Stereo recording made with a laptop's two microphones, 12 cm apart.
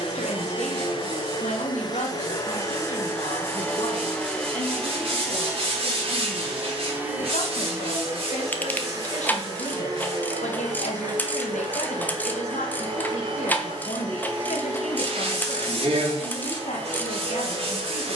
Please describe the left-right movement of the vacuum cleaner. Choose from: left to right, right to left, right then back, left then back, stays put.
left to right.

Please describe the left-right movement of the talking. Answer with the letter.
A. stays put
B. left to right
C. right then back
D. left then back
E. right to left
A.